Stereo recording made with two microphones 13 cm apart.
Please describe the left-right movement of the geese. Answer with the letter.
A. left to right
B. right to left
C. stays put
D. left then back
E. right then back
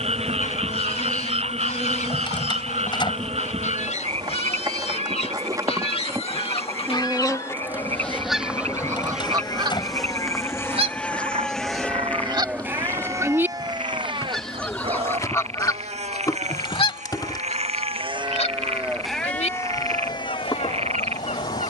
E.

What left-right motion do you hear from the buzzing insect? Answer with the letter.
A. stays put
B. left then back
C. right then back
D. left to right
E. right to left
E.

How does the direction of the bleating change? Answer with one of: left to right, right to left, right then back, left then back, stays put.
right then back.